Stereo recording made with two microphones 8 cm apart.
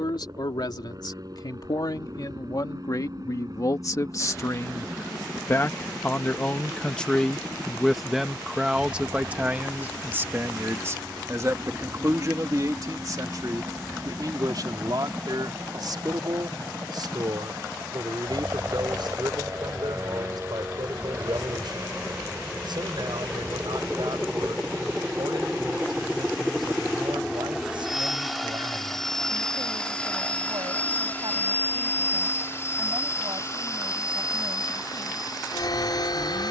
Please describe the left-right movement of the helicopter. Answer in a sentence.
In this clip you hear the helicopter move to the left.